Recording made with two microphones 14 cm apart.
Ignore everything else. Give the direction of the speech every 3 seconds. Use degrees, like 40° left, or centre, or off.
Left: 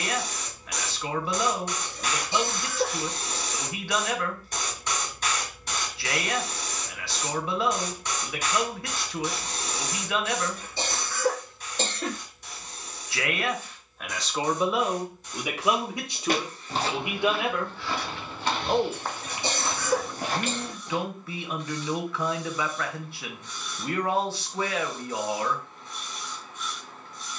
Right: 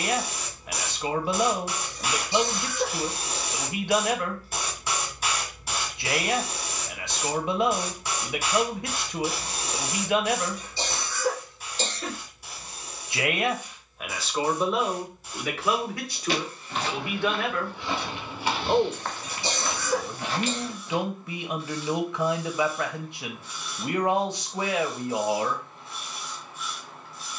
20° right, 20° right, 20° right, 20° right, 10° right, 20° left, 10° right, 20° right, 20° right.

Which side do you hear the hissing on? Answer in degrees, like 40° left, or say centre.
centre.